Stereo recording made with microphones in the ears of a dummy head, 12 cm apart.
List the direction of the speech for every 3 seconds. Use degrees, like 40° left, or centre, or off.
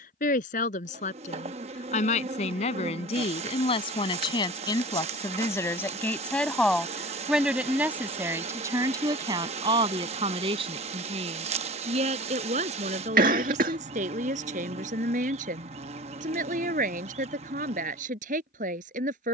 50° left, 30° left, 10° right, 40° right, 60° right, 60° right, 60° right.